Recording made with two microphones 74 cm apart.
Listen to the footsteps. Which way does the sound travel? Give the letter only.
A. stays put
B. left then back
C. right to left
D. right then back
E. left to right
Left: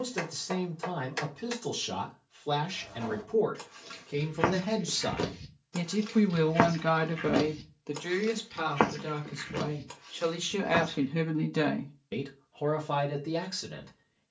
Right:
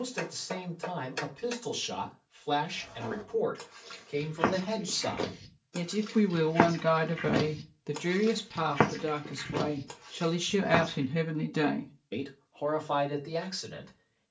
E.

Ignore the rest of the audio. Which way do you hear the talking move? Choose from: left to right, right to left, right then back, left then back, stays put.
right then back.